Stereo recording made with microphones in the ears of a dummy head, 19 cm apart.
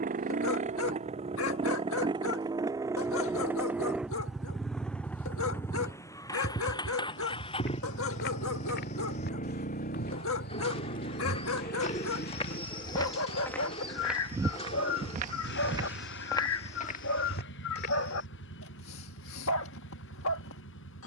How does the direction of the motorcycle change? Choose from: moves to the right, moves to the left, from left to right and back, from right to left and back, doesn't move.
moves to the left.